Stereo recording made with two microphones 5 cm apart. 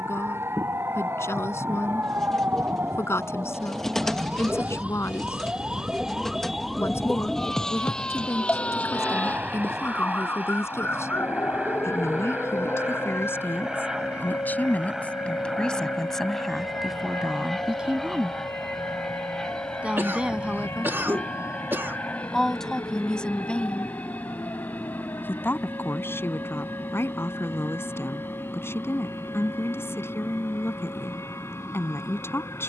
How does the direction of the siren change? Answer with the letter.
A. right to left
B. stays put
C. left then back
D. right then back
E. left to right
A.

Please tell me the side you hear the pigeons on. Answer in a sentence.
In this clip you hear the pigeons in the centre.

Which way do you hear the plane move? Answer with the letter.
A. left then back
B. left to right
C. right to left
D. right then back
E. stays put
C.